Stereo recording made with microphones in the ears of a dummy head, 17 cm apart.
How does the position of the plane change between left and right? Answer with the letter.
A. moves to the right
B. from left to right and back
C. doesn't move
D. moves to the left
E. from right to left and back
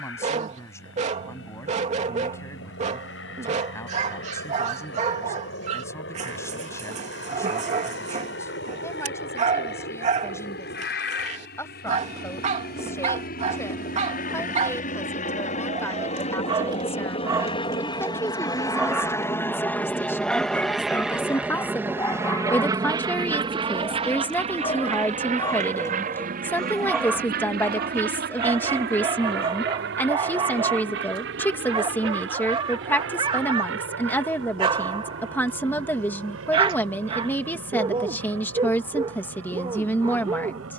A.